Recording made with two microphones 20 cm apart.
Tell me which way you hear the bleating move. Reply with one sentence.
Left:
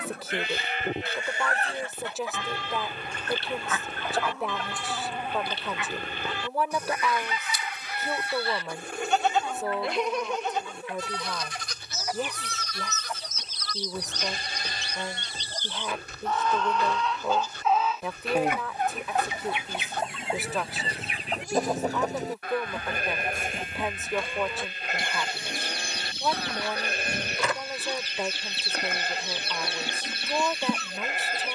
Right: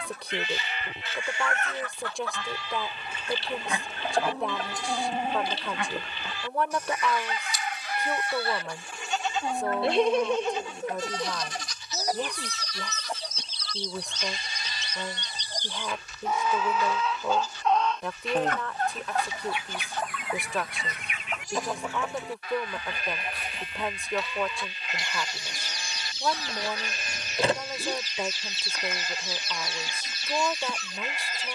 In this clip you hear the bleating stay put.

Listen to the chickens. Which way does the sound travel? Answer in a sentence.
You can hear the chickens go right and come back.